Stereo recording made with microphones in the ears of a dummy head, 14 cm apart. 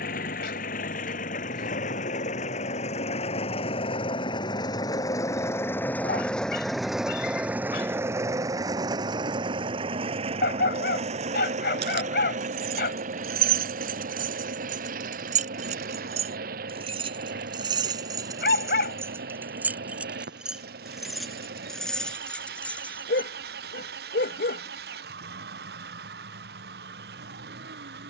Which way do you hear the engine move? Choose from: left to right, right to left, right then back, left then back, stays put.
left to right.